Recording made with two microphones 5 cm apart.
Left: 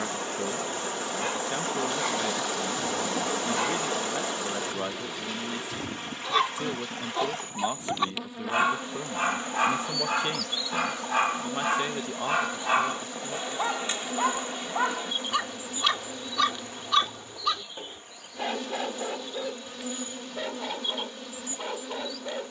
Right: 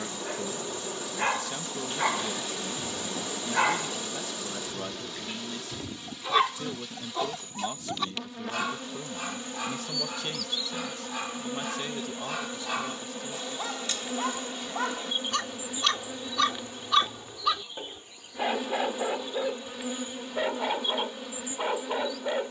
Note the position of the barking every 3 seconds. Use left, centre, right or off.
right, right, centre, left, left, centre, right, right.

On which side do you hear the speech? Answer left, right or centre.
left.